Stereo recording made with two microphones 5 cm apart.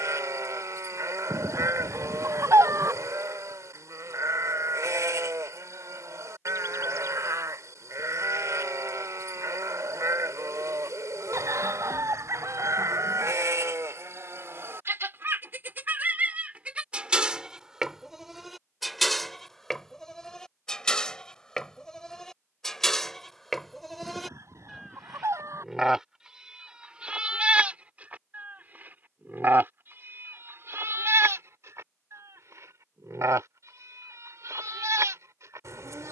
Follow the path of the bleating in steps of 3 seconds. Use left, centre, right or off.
right, right, right, right, right, right, centre, centre, centre, right, right, right.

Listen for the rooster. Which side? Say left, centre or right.
right.